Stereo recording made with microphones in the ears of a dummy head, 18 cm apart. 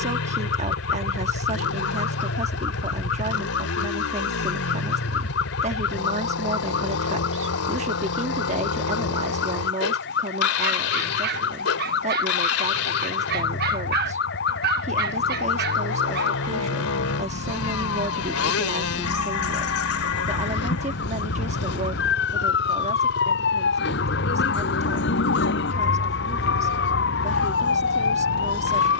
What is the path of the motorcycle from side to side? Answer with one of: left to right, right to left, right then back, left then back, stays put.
stays put.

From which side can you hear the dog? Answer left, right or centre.
right.